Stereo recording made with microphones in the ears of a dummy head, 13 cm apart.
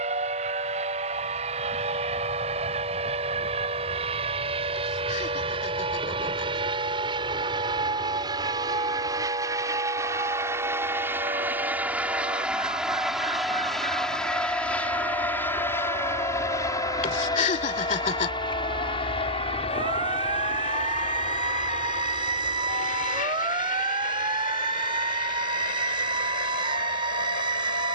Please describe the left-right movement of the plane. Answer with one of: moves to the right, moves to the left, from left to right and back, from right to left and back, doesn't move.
moves to the left.